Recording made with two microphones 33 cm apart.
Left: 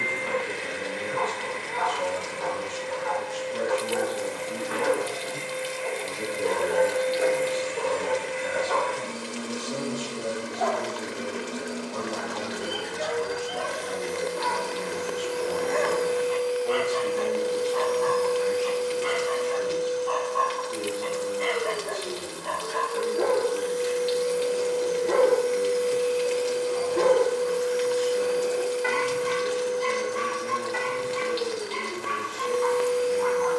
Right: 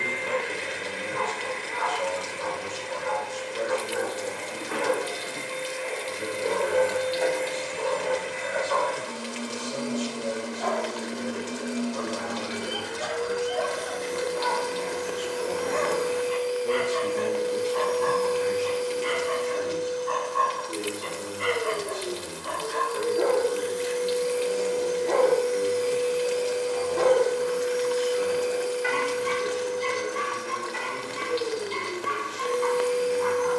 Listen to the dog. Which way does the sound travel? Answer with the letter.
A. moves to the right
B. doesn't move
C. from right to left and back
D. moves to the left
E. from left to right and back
E.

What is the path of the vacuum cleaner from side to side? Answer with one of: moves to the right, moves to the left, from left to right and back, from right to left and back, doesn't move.
from right to left and back.